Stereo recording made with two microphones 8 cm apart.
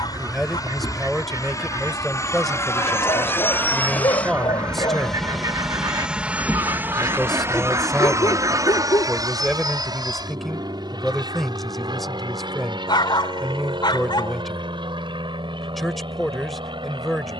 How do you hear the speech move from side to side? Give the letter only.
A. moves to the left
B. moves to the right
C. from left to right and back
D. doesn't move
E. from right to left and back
D.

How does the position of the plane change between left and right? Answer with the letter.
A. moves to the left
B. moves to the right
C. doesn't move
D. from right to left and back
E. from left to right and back
B.